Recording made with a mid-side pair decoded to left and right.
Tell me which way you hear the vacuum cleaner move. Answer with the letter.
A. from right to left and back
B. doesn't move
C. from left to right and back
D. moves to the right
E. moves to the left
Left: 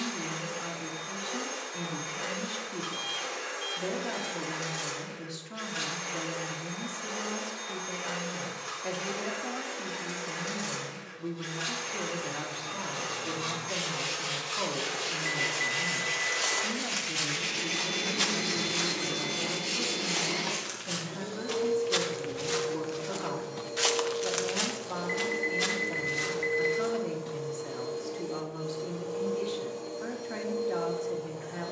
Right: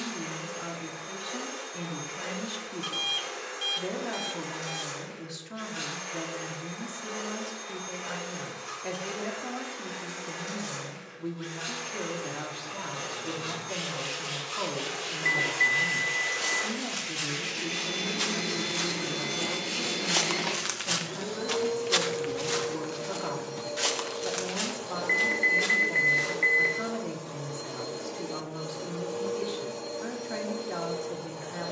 D.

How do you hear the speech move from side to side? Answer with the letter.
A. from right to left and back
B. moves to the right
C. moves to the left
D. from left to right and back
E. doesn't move
E.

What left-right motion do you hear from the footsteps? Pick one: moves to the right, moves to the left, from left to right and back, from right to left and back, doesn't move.
from left to right and back.